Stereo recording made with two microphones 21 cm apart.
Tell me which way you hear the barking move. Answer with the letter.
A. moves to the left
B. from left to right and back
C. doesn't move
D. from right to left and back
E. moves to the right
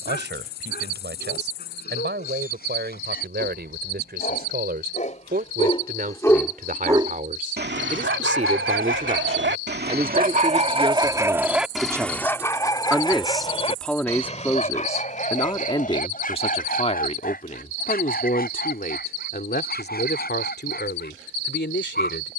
B.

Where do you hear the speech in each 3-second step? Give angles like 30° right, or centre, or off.
60° right, 50° right, 40° right, 20° right, centre, 30° left, 50° left, 60° left.